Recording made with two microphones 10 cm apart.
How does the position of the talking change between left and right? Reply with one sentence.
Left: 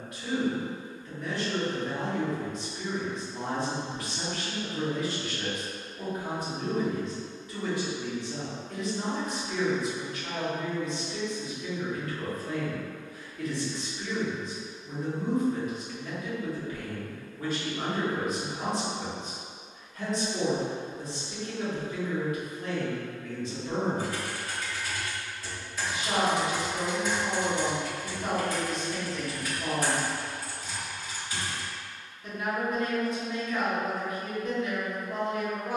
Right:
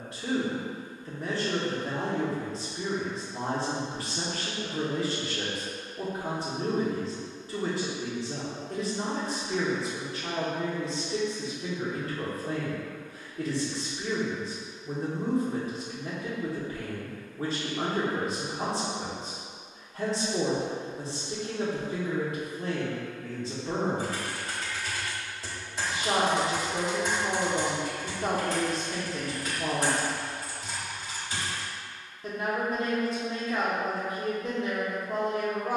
You can hear the talking stay in one place.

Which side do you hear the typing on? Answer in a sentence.
In this clip you hear the typing on the right.